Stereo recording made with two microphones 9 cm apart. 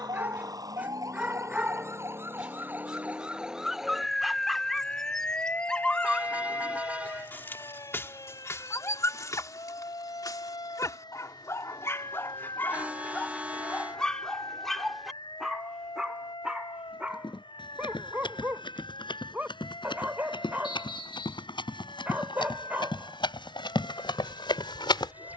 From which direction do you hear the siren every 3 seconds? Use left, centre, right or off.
right, centre, left, left, left, left, left, left, left.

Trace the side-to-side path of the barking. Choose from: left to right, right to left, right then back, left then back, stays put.
left then back.